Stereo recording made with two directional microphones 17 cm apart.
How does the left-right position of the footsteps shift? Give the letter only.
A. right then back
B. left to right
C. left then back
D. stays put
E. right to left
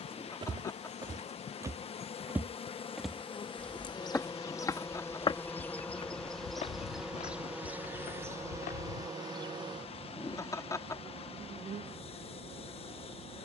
E.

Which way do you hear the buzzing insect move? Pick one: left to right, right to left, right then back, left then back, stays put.
left to right.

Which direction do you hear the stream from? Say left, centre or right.
left.